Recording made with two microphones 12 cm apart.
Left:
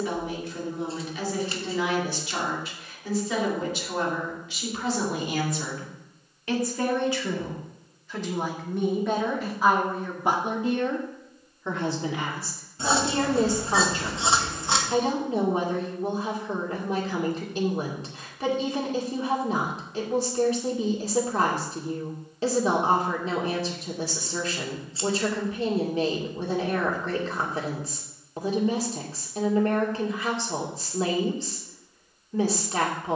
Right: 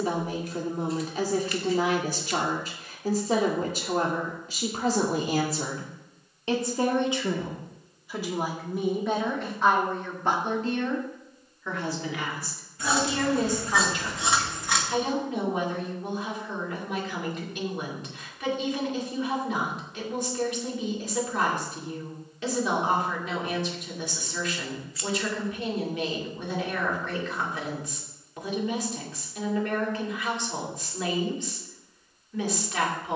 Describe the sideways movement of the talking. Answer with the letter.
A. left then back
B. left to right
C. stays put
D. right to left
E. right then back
D.